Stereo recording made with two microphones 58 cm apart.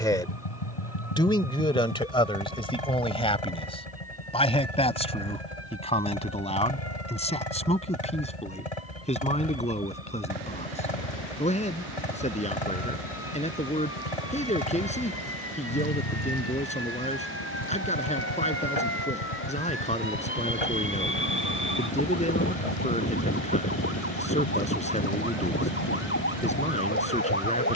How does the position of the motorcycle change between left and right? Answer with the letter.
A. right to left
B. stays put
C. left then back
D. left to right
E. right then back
B.